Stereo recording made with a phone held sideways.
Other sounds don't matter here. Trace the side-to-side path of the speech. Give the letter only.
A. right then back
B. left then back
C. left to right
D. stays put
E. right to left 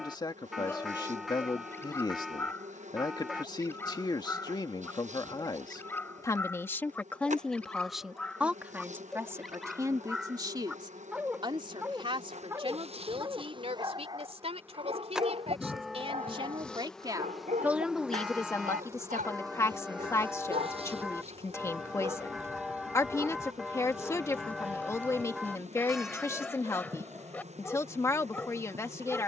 A.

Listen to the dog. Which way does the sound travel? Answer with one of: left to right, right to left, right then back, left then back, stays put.
right then back.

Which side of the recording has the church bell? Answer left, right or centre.
centre.